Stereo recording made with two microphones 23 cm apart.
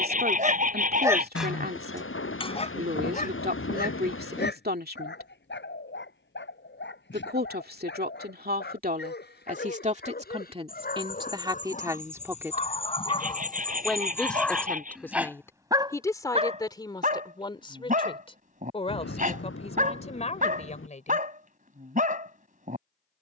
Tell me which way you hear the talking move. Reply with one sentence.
You can hear the talking move to the left.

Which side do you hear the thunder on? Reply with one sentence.
You can hear the thunder on the left.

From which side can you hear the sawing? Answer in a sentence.
You can hear the sawing on the right.